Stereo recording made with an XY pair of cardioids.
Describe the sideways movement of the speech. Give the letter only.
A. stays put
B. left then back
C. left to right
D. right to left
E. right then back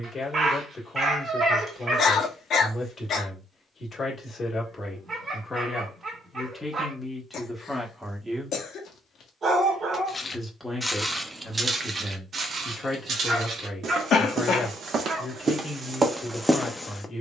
E.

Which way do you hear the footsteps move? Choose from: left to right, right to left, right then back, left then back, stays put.
right then back.